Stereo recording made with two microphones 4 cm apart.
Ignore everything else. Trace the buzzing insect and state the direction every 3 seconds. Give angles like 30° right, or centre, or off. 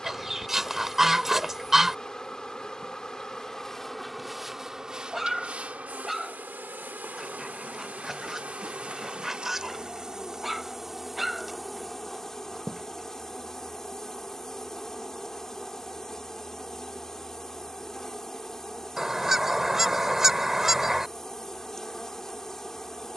10° left, 10° right, 40° right, 10° right, 10° left, 10° left, 10° left, 10° left.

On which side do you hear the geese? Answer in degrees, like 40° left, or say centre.
10° right.